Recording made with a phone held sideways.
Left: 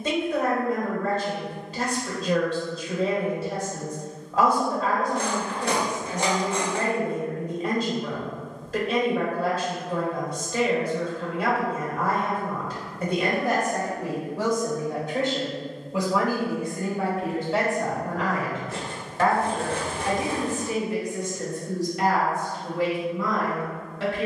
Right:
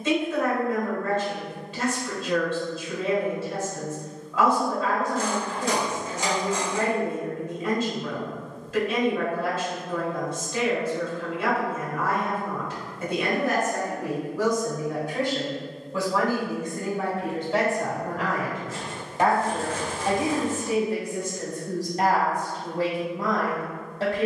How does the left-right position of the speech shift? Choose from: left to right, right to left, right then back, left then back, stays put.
left to right.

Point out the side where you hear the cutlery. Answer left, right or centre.
left.